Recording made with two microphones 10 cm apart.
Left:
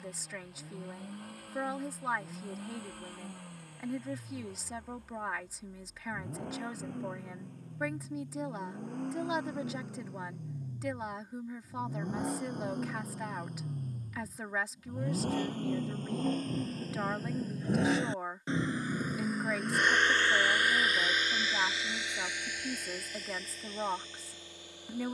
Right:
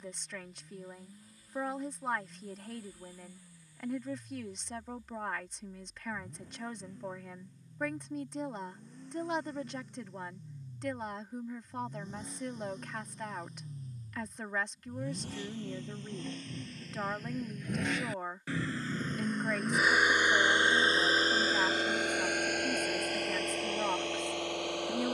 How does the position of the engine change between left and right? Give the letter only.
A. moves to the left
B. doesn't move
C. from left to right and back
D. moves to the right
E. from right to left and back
D.